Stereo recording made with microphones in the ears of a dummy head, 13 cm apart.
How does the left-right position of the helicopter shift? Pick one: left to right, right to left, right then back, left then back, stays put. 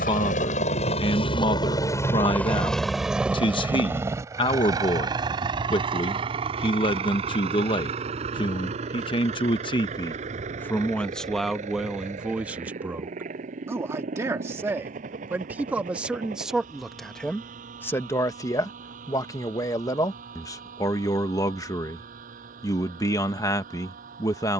left to right.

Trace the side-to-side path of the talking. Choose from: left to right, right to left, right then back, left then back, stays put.
right then back.